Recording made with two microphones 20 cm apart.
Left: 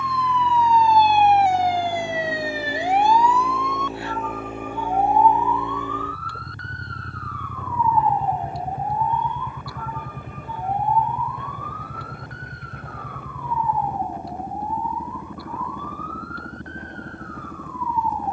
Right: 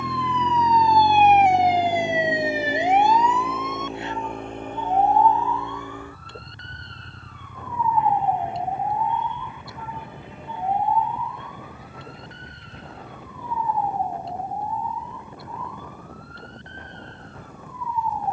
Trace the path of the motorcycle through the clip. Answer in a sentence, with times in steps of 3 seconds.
In this clip you hear the motorcycle on the right from 0 s, in the centre from 3 s and on the left from 6 s.